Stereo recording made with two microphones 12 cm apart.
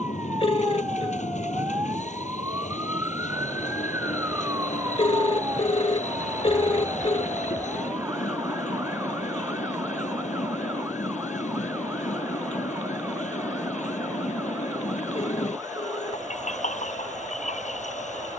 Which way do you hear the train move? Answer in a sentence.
In this clip you hear the train stay in one place.